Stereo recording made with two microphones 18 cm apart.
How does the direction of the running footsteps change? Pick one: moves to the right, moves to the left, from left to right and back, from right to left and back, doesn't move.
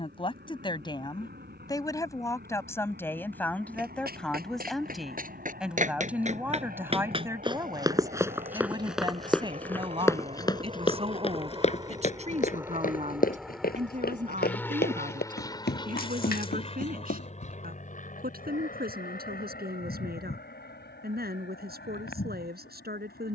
moves to the left.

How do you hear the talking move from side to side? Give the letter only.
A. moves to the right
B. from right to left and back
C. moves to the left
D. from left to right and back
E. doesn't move
A.